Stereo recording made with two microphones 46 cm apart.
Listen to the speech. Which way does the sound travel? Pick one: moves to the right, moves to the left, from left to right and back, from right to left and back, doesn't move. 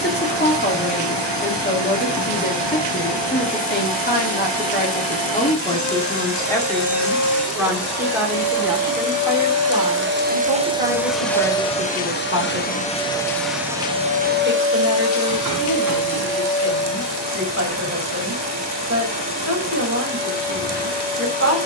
moves to the right.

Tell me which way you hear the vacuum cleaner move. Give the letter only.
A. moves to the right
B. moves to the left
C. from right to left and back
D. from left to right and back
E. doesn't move
C.